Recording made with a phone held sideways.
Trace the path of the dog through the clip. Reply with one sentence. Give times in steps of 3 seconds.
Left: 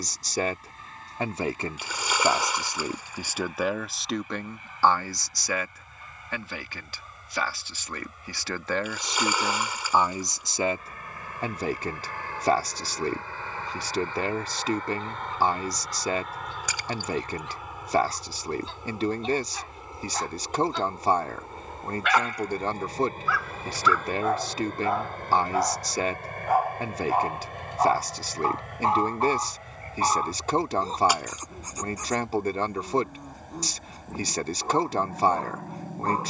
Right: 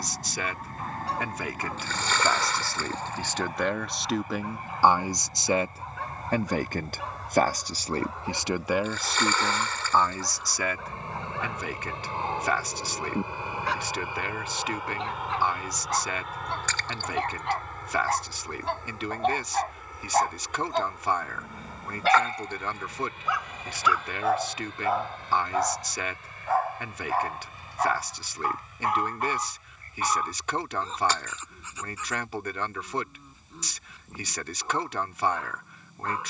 In this clip you hear the dog on the right from 0 s, in the centre from 24 s and on the left from 27 s.